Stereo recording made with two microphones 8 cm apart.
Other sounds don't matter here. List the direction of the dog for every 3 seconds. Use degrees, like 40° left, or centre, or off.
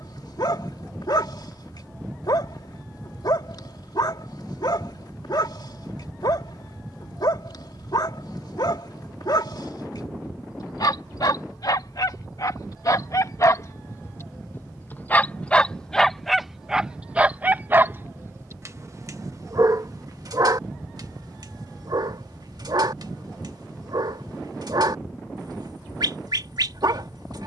60° left, 60° left, 60° left, 60° left, 50° left, 10° right, 50° right, 60° right, 60° right.